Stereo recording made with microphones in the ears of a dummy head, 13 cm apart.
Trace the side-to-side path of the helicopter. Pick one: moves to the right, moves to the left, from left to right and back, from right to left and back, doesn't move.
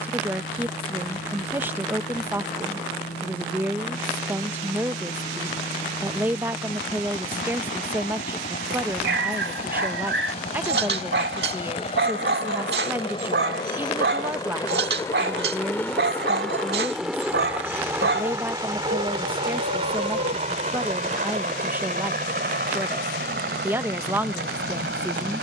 moves to the right.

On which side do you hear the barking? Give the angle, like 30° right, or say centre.
80° right.